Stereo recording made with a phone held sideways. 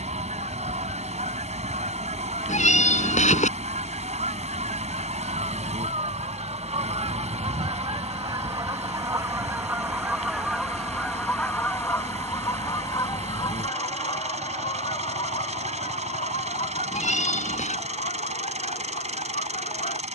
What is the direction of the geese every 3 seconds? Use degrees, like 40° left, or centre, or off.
60° right, 60° right, 40° right, centre, 30° left, 50° left, 60° left.